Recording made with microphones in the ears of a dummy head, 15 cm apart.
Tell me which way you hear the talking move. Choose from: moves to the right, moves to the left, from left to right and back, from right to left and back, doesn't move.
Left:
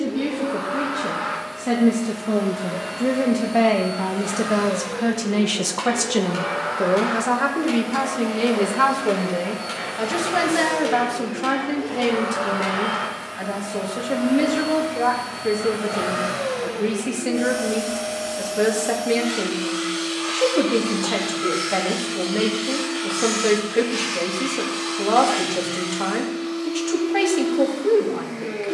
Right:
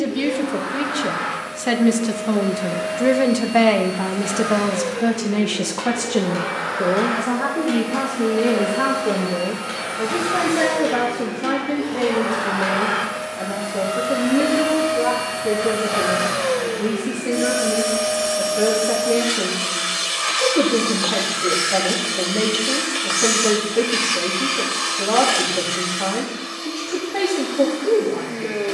moves to the left.